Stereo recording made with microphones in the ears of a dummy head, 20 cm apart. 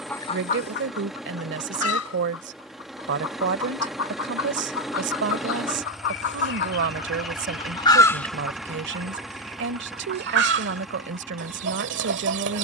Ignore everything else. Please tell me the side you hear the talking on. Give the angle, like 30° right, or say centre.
60° right.